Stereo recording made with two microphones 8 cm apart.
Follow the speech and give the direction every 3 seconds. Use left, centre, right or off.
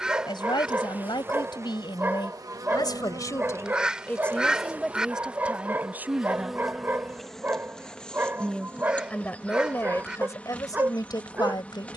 left, centre, centre, left.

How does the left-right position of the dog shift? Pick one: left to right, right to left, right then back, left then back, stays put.
stays put.